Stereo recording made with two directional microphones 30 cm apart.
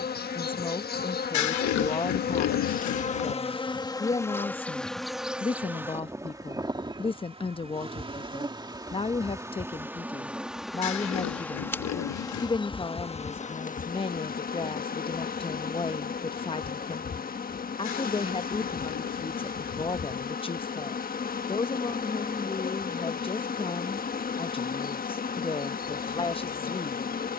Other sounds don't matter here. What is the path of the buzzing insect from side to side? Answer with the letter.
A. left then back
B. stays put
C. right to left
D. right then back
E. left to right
D.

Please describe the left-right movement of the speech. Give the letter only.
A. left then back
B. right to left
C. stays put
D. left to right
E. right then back
C.